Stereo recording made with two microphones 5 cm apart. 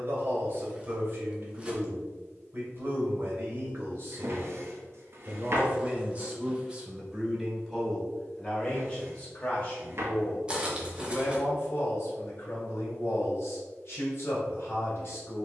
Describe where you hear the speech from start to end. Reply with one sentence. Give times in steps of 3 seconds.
In this clip you hear the speech on the right from 0 s, in the centre from 6 s and on the left from 9 s.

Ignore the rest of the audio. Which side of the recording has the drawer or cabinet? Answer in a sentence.
In this clip you hear the drawer or cabinet on the right.